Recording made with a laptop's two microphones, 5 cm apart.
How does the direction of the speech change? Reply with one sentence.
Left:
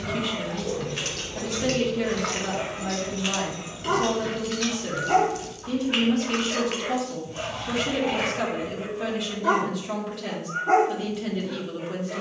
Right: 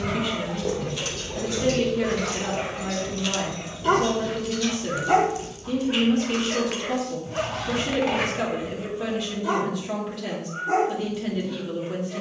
You can hear the speech stay put.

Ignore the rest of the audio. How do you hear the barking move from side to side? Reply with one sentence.
You can hear the barking move to the left.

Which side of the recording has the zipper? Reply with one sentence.
You can hear the zipper on the right.